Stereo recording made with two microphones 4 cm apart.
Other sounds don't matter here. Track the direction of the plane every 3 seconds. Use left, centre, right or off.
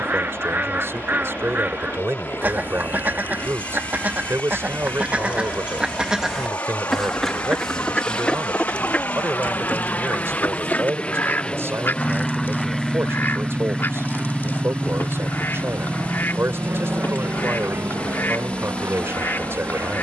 left, left, left, left, centre, right, right.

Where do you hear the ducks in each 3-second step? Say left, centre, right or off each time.
right, right, centre, left, left, left, left.